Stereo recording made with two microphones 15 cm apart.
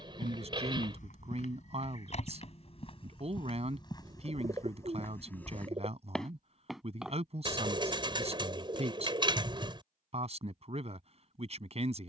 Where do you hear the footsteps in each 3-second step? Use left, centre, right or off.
left, left, centre, off.